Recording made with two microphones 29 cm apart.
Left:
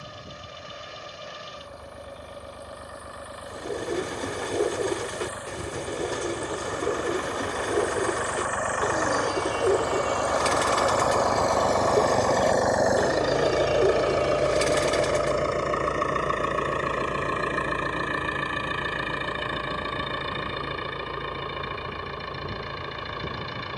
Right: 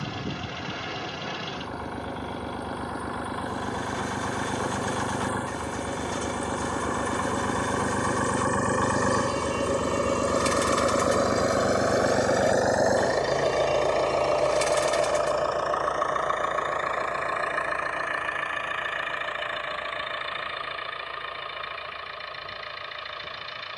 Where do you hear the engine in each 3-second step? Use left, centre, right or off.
right, right, right, right, centre, left, left, left.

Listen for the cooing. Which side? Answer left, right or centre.
left.